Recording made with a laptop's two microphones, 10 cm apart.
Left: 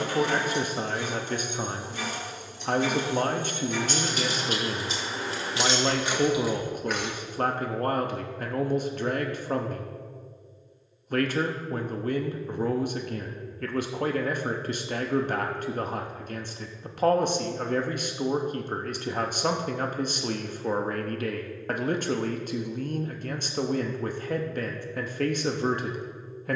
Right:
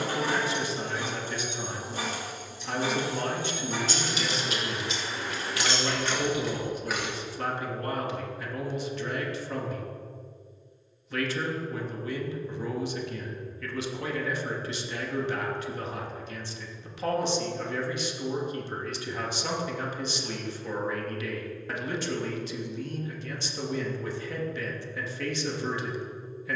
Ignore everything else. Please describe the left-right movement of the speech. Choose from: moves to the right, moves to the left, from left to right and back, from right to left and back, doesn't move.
doesn't move.